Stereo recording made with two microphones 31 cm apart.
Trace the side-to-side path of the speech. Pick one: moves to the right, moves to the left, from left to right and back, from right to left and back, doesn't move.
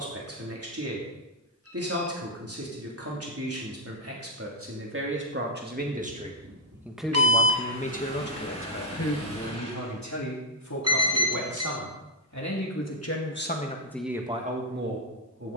from right to left and back.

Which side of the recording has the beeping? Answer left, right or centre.
right.